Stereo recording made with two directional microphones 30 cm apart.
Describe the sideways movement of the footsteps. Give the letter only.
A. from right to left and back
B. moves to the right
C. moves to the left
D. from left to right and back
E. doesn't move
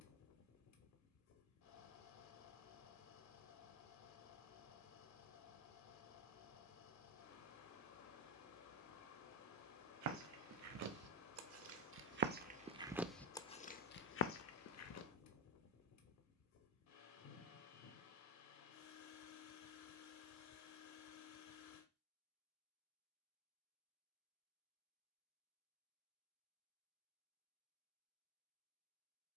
C.